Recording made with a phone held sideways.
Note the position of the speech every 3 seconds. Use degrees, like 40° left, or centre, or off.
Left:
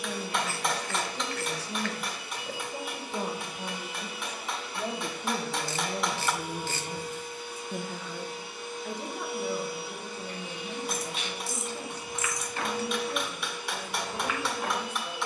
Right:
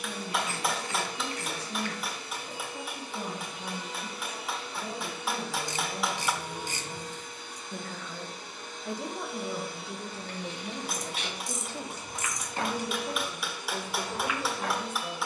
80° left, 70° left, 30° left, 30° right, 50° right.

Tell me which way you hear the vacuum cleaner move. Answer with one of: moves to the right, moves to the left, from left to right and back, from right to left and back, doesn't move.
doesn't move.